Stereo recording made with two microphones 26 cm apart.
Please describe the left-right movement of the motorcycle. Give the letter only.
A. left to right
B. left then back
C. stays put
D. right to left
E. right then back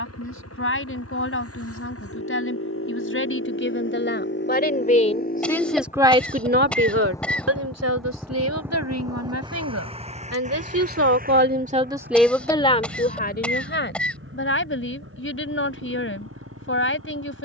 A.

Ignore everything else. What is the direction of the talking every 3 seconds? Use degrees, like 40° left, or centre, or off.
50° left, 30° left, 60° right, 60° right, 30° left, 50° left.